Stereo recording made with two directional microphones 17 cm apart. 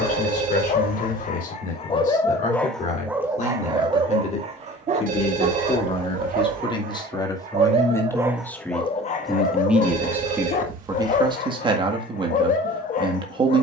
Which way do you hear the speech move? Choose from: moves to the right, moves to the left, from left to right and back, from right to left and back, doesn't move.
moves to the right.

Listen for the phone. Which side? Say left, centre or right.
right.